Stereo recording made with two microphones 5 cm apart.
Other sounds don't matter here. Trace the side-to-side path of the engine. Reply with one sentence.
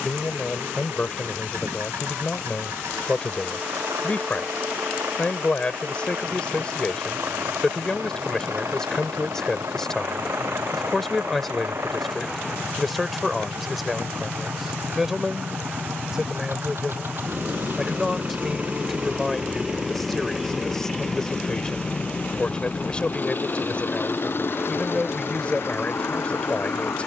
You can hear the engine go from the right side to the left.